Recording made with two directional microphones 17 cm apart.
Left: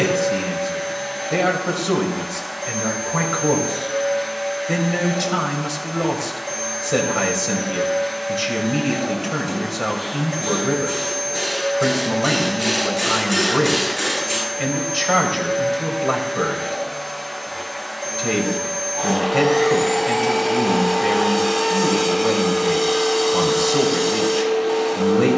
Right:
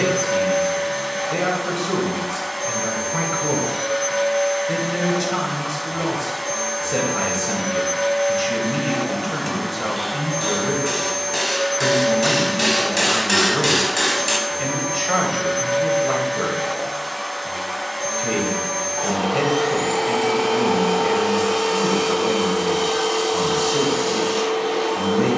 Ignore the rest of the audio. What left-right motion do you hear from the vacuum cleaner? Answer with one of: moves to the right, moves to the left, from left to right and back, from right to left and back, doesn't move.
doesn't move.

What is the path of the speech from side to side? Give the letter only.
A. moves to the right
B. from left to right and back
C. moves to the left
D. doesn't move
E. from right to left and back
D.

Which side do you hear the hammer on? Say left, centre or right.
right.